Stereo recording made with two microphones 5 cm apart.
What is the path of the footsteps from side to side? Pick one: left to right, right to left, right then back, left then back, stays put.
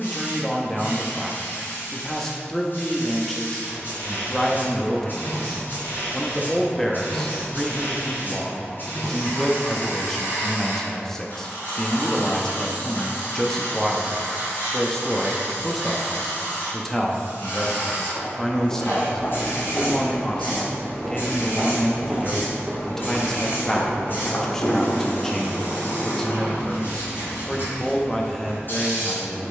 right then back.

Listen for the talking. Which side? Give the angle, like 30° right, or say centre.
10° left.